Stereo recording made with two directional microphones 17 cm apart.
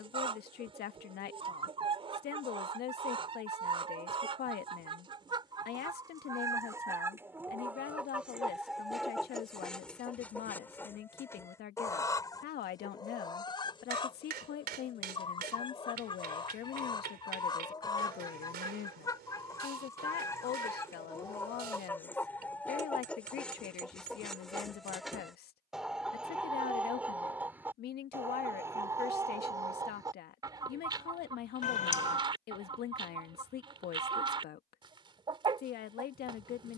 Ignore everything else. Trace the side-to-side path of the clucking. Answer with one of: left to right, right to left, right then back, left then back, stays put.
left then back.